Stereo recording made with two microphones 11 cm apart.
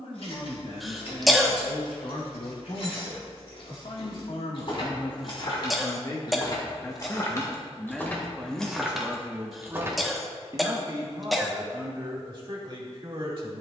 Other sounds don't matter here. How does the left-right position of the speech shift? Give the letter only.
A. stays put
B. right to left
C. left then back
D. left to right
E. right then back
D.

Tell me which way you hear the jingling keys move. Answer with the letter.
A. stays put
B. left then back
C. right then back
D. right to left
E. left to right
E.